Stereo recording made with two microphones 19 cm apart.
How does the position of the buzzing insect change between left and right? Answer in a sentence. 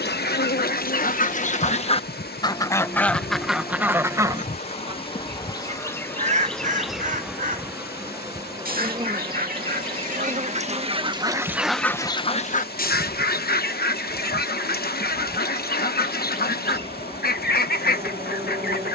In this clip you hear the buzzing insect move to the right.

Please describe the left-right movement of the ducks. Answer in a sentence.
You can hear the ducks move from left to right and back again.